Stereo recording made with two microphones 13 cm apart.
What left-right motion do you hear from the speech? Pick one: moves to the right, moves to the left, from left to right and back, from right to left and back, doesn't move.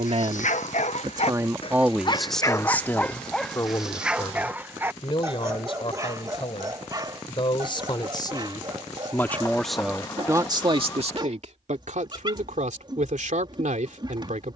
from right to left and back.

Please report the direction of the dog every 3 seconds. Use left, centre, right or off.
left, centre, right, right, right.